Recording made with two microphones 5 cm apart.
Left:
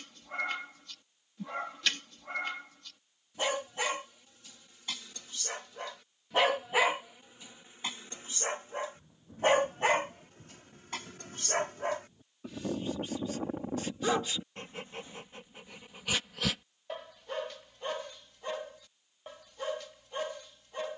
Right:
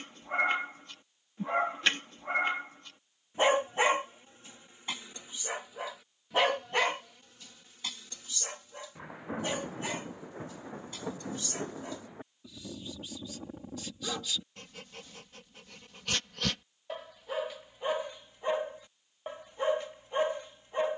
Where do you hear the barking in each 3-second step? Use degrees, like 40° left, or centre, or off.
30° right, 20° right, 20° left, 60° left, 40° left, 10° left, 20° right.